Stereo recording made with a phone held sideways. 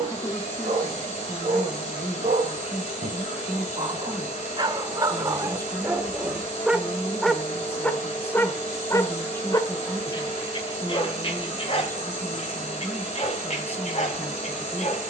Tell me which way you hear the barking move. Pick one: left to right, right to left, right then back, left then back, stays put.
right to left.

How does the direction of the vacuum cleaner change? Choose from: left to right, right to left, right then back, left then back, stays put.
stays put.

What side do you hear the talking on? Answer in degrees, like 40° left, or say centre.
10° left.